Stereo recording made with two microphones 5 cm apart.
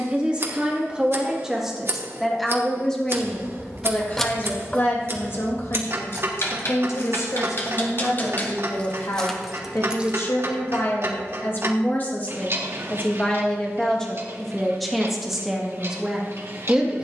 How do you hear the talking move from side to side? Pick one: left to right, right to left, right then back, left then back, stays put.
left then back.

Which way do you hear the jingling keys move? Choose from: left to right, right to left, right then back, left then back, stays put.
left then back.